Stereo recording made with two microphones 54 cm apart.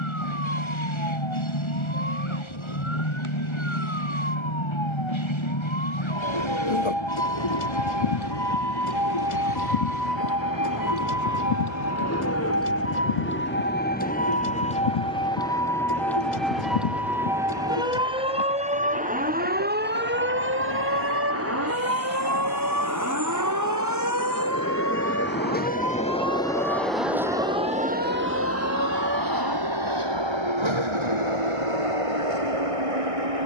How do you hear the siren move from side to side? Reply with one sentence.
In this clip you hear the siren go from the left side to the right.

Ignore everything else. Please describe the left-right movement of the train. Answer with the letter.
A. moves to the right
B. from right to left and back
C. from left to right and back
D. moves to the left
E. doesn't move
A.